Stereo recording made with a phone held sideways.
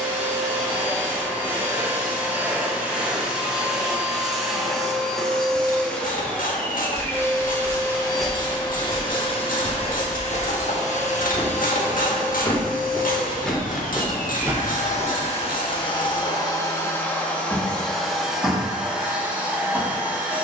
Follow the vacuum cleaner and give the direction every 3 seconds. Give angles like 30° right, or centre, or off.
10° right, centre, 20° left, 50° left, 70° left, 30° left, 10° right.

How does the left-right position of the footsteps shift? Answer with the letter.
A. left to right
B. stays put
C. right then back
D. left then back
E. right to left
D.